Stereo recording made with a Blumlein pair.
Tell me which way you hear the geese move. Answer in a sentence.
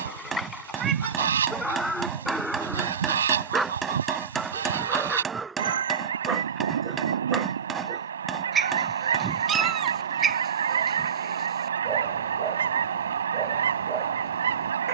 You can hear the geese stay put.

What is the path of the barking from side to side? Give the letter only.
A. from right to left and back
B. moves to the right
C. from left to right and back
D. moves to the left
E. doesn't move
B.